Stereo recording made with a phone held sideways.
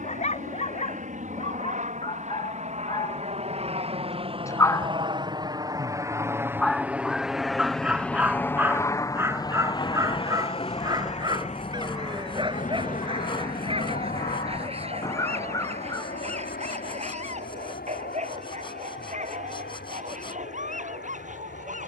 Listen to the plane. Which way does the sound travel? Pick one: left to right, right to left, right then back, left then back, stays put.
right to left.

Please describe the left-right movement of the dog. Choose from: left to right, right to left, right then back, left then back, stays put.
left to right.